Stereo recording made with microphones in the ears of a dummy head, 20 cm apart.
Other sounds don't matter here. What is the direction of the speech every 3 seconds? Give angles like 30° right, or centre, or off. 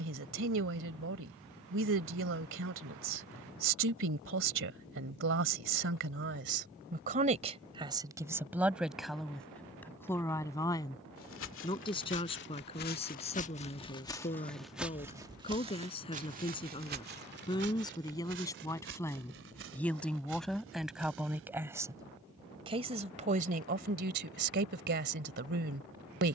60° right, 60° right, 30° right, 10° left, 30° left, 20° left, 10° left, 20° right, 50° right.